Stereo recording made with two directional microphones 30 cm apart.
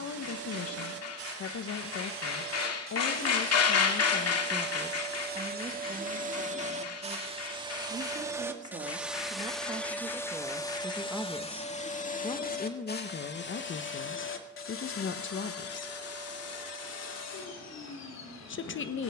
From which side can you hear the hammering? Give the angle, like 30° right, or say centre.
50° left.